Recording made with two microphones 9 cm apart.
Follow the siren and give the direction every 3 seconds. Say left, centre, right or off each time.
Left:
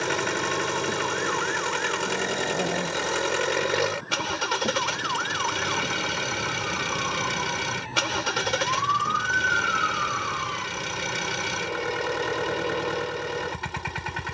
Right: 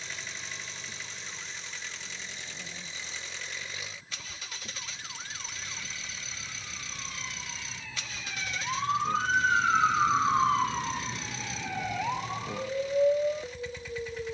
left, left, left, right, right.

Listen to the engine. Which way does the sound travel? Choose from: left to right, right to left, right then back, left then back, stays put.
stays put.